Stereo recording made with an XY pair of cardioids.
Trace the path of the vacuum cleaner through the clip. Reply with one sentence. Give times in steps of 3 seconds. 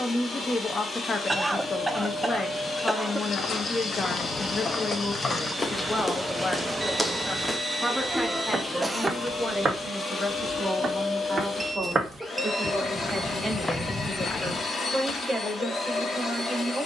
In this clip you hear the vacuum cleaner on the left from 0 s, in the centre from 3 s and on the left from 9 s.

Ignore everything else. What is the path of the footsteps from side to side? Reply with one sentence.
In this clip you hear the footsteps go right and come back.